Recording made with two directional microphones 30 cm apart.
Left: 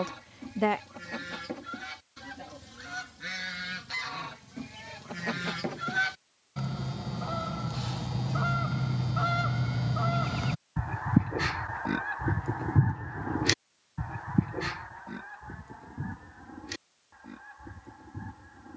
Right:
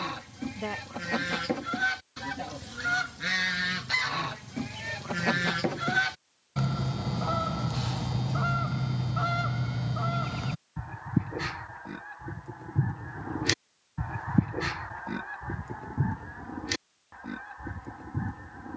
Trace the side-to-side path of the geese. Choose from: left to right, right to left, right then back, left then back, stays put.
left then back.